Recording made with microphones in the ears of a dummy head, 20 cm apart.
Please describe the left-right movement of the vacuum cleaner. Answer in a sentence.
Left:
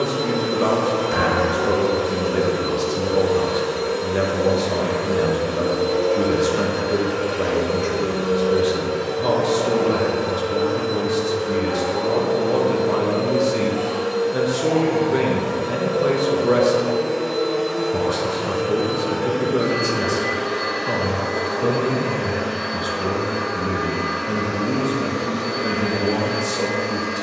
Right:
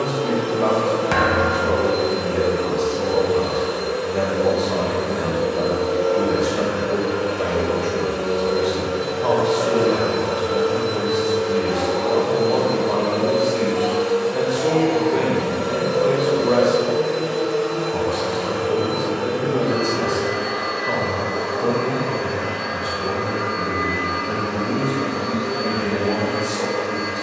You can hear the vacuum cleaner move from left to right and back again.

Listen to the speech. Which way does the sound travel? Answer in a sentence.
You can hear the speech stay put.